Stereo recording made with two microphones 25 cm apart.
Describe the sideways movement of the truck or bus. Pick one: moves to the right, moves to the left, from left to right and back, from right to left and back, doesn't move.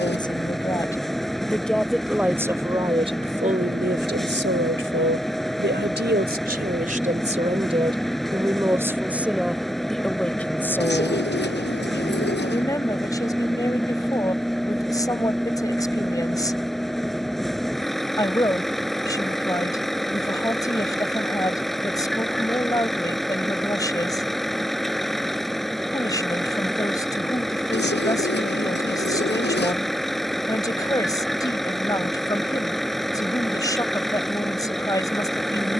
doesn't move.